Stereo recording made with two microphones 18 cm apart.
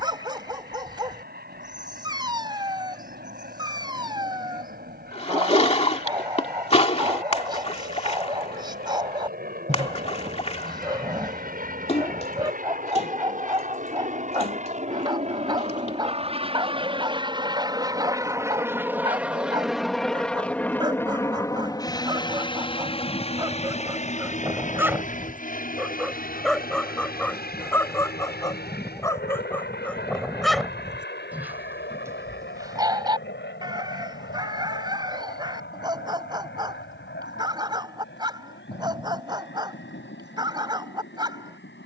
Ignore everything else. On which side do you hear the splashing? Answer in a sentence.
You can hear the splashing on the left.